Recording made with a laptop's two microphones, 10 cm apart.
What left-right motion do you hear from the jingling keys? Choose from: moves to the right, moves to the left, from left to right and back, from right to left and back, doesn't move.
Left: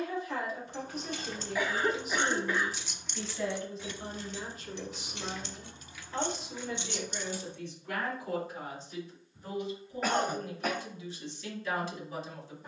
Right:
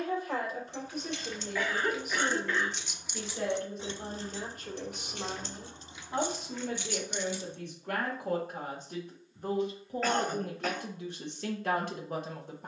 from left to right and back.